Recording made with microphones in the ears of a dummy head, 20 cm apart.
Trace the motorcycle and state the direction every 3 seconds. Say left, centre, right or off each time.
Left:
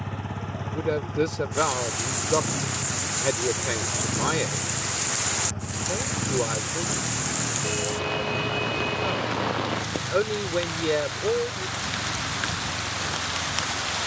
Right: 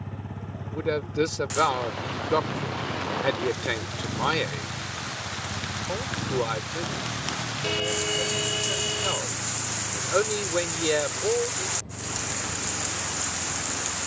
left, centre, right, right, right.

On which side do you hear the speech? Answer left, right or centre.
right.